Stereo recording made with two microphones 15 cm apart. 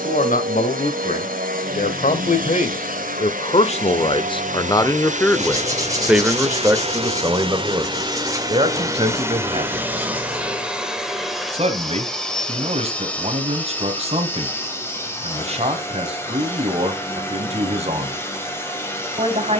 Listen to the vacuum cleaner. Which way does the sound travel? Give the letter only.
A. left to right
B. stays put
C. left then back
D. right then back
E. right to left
E.